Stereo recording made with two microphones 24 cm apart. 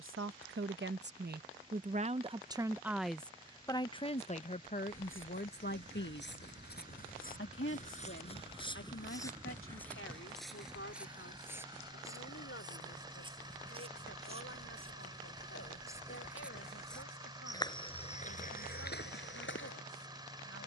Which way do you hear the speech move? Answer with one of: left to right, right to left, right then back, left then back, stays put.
right to left.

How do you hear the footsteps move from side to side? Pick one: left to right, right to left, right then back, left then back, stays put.
right then back.